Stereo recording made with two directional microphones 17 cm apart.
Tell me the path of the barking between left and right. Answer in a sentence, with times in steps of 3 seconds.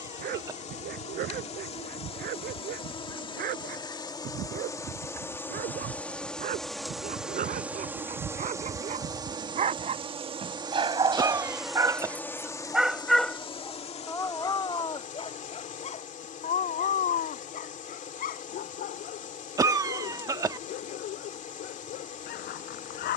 In this clip you hear the barking on the right from 0 s, in the centre from 12 s and on the left from 15 s.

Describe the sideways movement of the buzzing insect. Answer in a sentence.
You can hear the buzzing insect move from left to right and back again.